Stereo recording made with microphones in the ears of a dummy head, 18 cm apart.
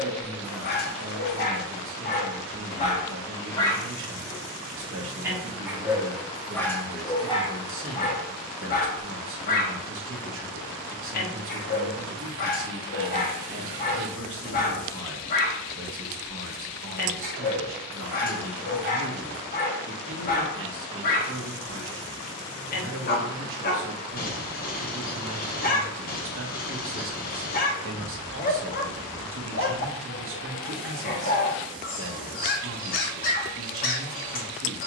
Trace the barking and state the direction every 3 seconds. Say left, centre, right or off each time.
left, centre, left, left, left, left, left, left, left, left, left, left.